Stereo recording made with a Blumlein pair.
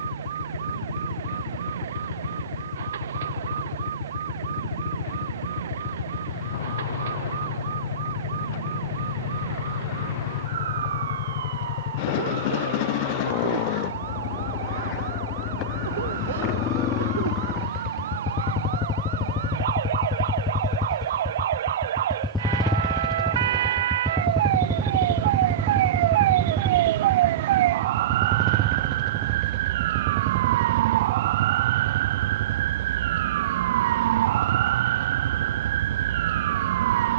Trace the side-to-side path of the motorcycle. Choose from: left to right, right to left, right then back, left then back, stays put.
left to right.